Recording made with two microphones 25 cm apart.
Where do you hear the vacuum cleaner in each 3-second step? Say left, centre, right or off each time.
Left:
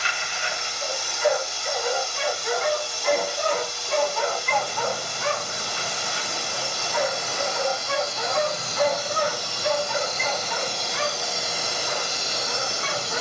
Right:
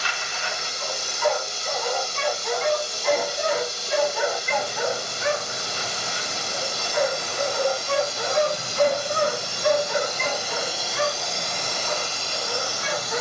right, right, right, centre, left.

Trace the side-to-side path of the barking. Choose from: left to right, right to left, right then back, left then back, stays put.
left to right.